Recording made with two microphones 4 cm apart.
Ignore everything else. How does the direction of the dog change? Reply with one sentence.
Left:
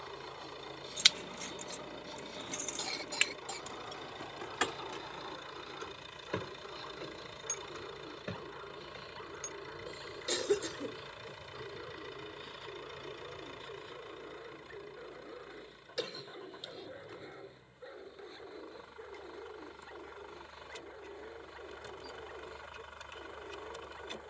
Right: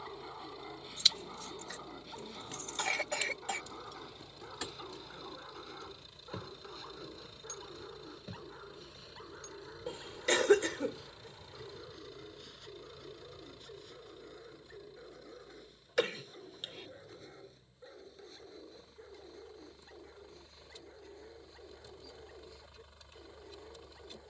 In this clip you hear the dog travel towards the left.